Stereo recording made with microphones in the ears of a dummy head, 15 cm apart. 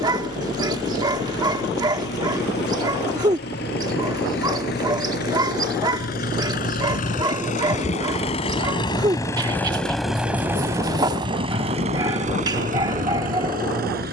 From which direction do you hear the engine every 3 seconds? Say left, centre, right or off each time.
left, left, left, centre, right.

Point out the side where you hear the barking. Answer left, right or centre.
right.